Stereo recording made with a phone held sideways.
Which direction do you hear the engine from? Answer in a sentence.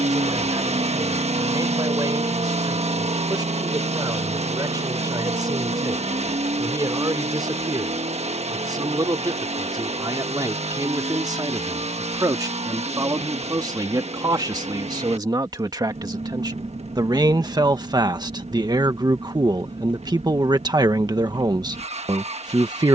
You can hear the engine on the right.